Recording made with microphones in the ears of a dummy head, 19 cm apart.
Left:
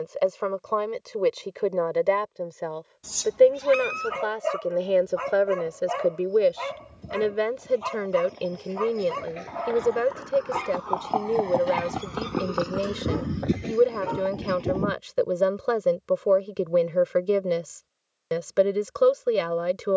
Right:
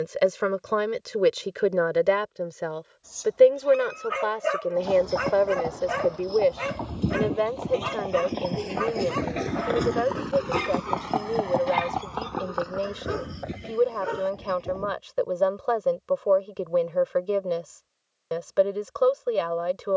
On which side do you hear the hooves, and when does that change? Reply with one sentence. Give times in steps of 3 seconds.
In this clip you hear the hooves not at all from 0 s, on the right from 3 s, on the left from 12 s and not at all from 15 s.